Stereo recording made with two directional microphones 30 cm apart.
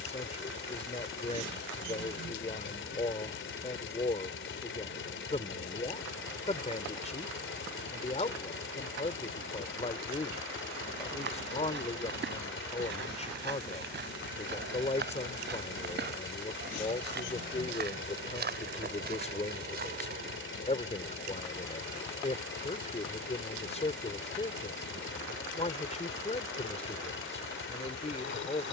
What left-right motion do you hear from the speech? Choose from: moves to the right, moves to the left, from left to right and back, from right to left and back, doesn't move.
doesn't move.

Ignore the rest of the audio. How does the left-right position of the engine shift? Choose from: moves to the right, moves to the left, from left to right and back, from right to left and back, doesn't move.
doesn't move.